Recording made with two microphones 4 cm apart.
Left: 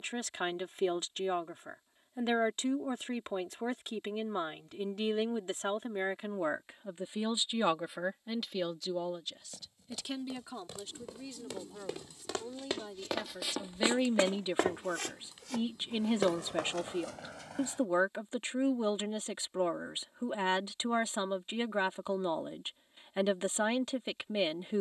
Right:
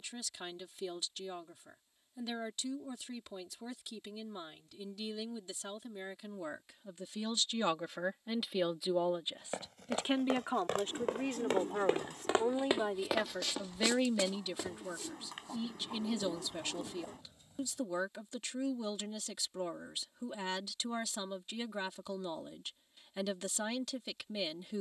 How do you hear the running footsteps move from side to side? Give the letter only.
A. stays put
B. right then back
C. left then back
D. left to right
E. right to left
E.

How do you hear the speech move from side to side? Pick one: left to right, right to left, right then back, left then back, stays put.
right then back.